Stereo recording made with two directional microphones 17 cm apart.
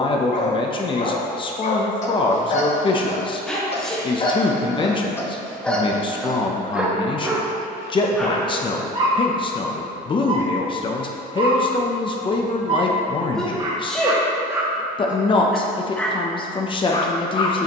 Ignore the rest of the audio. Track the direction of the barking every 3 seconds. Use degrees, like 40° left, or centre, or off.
40° left, 20° left, 10° right, 30° right, 30° right, 10° left.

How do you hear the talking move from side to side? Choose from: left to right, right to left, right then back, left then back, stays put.
stays put.